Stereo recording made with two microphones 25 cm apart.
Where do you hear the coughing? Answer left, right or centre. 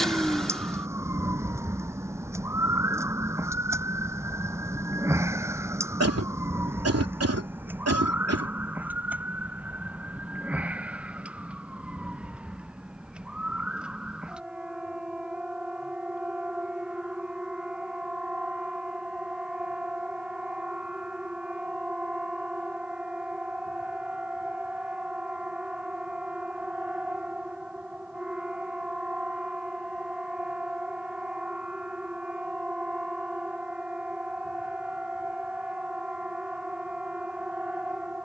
right.